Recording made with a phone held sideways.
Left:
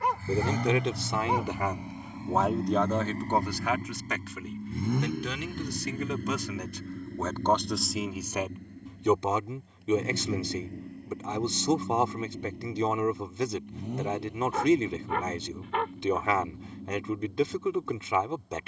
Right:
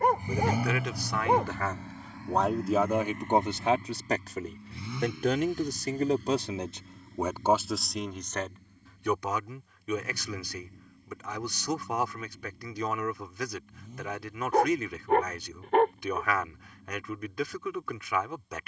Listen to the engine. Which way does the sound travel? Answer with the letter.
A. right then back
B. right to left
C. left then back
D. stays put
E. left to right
B.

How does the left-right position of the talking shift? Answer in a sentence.
In this clip you hear the talking move from left to right and back again.